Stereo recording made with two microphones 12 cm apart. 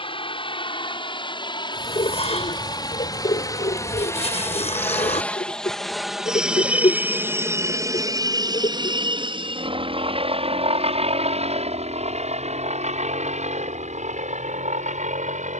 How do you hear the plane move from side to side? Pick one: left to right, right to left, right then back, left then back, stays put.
left to right.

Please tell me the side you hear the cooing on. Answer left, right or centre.
left.